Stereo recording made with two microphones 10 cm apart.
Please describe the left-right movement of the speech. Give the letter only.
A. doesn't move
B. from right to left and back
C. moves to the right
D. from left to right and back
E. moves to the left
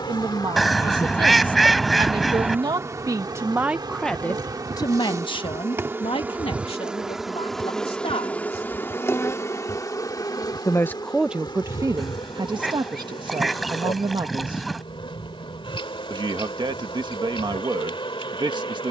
B.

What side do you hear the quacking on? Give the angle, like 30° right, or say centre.
centre.